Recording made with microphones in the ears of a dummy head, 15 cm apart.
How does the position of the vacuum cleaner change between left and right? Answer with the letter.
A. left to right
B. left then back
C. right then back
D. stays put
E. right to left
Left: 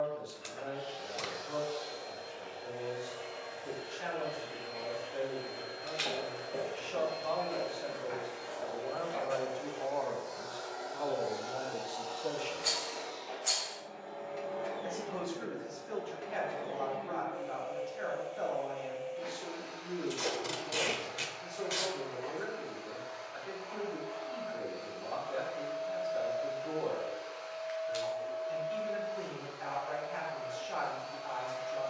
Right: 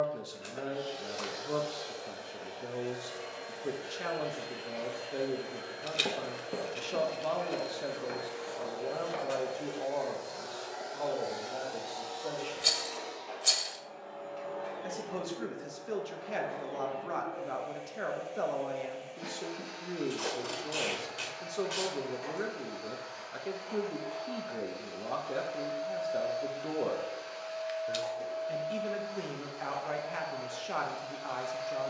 B.